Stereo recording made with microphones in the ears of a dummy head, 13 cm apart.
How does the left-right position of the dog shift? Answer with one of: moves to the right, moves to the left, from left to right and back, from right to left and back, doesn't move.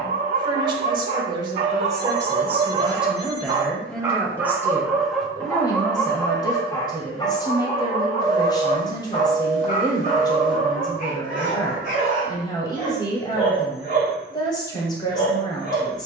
moves to the left.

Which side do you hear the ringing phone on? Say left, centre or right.
left.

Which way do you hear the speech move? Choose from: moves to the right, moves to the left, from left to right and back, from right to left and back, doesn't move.
moves to the left.